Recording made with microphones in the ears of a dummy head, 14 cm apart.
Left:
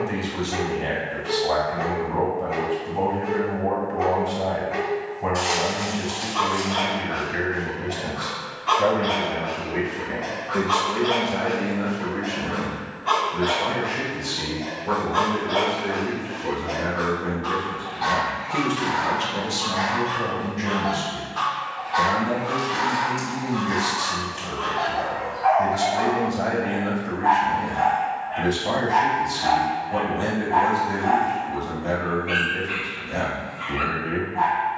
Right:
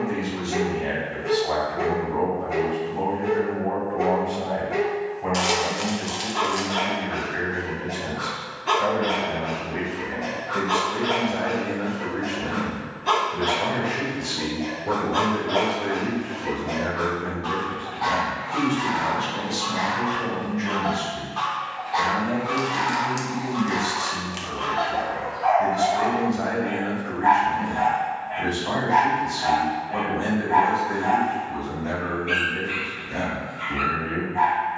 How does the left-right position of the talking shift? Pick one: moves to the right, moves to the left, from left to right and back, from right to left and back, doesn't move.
from left to right and back.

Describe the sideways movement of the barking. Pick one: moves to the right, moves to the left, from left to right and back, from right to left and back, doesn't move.
from right to left and back.